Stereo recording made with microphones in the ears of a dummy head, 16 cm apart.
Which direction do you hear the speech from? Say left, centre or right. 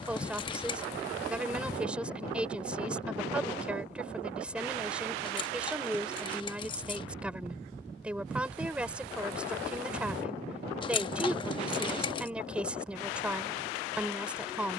centre.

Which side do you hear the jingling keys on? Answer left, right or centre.
left.